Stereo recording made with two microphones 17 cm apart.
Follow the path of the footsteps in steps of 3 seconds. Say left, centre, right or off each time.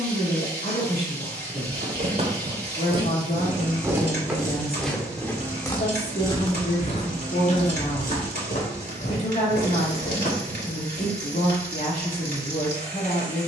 right, centre, left, left, off.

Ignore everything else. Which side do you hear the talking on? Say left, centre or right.
left.